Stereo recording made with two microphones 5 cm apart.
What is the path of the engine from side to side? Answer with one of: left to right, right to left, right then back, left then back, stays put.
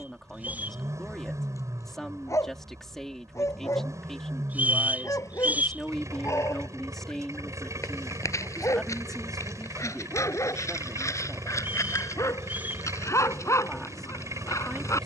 stays put.